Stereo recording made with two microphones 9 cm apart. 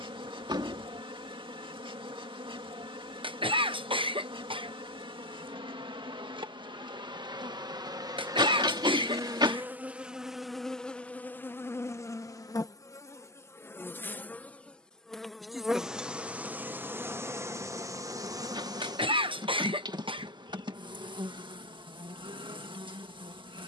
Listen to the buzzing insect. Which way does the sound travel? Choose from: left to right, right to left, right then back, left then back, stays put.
left then back.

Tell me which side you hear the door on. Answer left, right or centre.
right.